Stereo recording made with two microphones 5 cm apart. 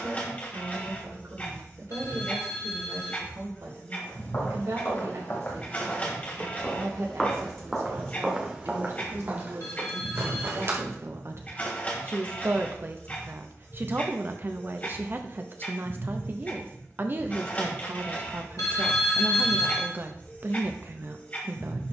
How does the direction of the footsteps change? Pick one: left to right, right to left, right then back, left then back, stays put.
left to right.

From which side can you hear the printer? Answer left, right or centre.
left.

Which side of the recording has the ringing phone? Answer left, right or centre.
left.